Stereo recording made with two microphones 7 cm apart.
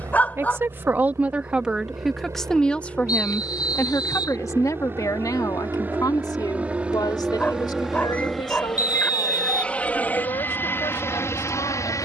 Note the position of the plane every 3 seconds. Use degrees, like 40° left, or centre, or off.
40° right, 30° right, 10° right, 30° left.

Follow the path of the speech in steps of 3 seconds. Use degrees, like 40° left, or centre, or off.
10° right, 50° left, 70° left, 80° left.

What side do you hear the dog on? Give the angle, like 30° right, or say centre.
20° left.